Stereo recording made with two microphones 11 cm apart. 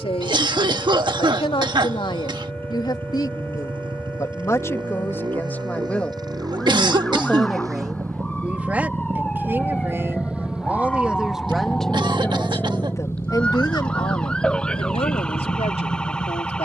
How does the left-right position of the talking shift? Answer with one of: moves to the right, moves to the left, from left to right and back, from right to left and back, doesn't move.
from left to right and back.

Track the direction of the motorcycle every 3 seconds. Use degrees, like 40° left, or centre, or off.
50° right, 50° right, 30° right, 10° right, 30° left, 50° left.